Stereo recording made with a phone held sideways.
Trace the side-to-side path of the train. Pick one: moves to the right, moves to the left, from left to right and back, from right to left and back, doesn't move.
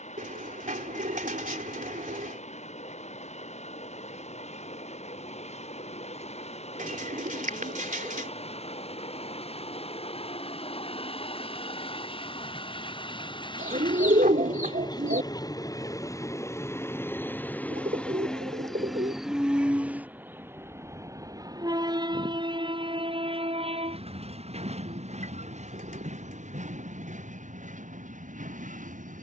moves to the right.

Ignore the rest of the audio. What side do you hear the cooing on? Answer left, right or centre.
right.